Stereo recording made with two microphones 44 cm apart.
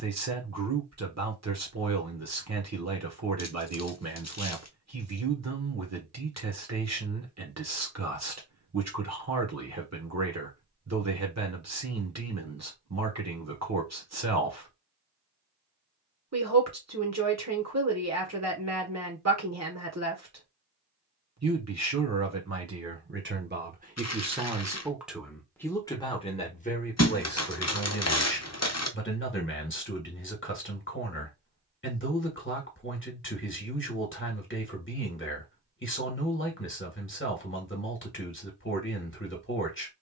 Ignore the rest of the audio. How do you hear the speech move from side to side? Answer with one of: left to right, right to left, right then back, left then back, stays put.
right to left.